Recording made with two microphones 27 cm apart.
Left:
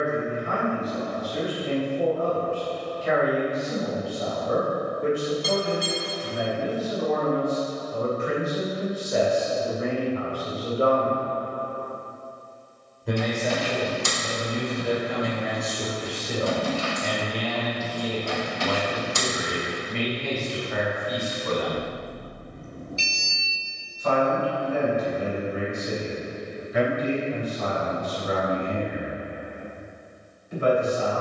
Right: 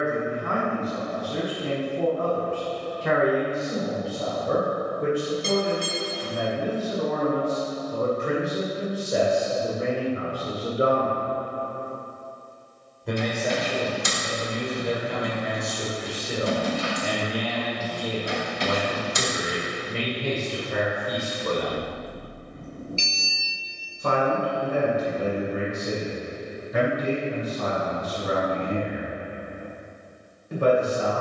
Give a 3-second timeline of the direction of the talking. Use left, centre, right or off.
right, right, right, right, centre, centre, right, right, right, right, right.